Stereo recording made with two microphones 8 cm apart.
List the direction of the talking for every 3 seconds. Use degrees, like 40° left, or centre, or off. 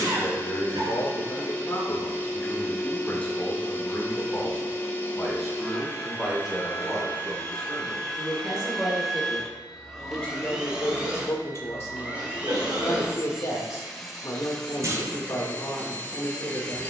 30° left, 10° left, 10° right, 20° left, 30° left, 30° left.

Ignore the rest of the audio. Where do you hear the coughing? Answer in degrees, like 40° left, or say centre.
70° right.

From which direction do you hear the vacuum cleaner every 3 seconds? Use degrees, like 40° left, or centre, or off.
30° left, 30° left, 20° left, 10° right, centre, 20° left.